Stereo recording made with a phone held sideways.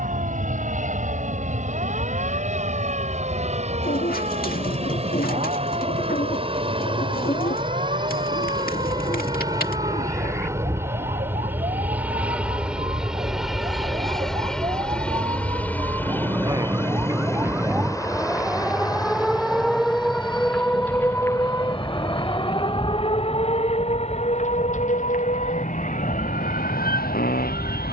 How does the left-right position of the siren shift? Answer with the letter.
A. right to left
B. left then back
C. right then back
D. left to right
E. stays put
A.